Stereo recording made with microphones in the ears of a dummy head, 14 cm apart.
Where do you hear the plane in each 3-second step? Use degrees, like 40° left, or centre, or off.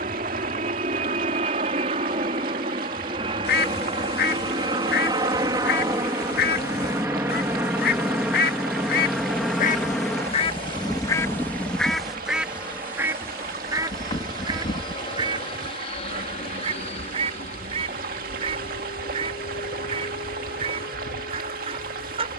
40° right, 30° right, 10° right, 10° left, 20° left, 40° left, 50° left, 50° left.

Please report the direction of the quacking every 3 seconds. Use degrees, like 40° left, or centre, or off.
off, 70° left, 70° left, 30° left, 20° right, 30° right, 40° right, 40° right.